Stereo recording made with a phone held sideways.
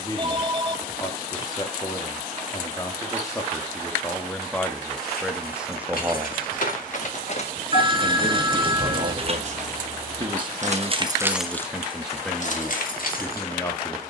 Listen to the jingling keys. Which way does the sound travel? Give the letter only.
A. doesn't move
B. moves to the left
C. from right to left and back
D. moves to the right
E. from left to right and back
E.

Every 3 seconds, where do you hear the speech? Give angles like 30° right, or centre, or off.
20° left, 10° left, 40° right, 30° right, 10° left.